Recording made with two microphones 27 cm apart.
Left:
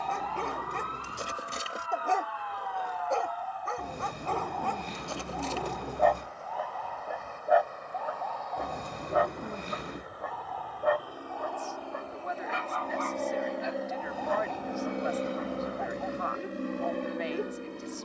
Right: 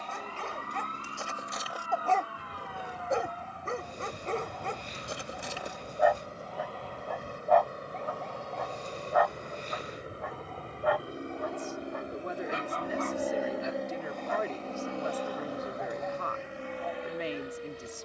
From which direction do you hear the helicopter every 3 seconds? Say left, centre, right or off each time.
right, right, right, right, centre, left.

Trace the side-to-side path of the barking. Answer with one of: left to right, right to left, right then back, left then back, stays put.
right then back.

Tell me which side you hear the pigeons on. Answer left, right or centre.
left.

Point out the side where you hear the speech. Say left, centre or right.
right.